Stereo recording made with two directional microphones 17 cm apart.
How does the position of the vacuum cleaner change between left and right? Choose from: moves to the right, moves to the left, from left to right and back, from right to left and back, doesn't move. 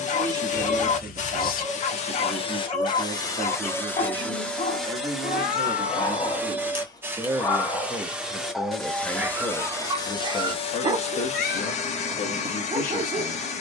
from left to right and back.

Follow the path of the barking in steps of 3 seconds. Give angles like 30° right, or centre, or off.
40° left, 40° left, 10° left, 20° right, 30° right.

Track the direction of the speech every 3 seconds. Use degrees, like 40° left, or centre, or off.
30° right, 30° right, 10° right, 30° left, 50° left.